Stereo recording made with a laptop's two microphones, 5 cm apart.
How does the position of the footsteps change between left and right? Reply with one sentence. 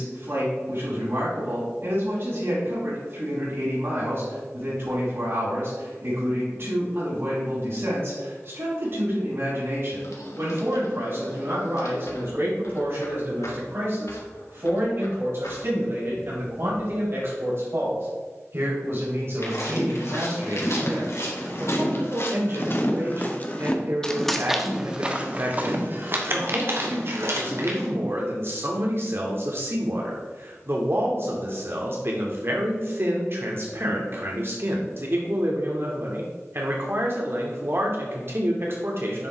In this clip you hear the footsteps move from left to right.